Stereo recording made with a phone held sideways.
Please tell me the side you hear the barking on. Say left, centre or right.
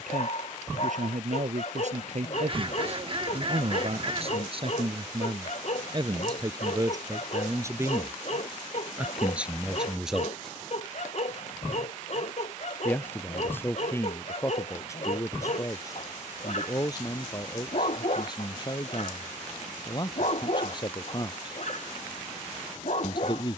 left.